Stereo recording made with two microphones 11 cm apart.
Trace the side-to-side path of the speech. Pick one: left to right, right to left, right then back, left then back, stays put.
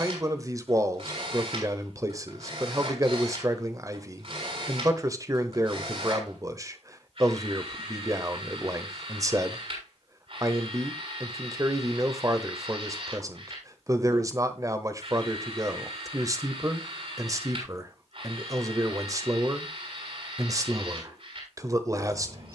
stays put.